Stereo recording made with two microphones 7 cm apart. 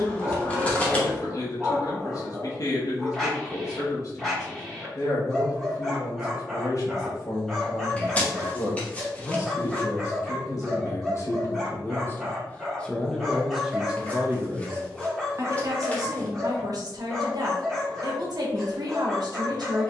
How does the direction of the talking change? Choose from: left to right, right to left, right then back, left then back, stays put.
left to right.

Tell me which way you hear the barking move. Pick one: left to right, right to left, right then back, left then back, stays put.
stays put.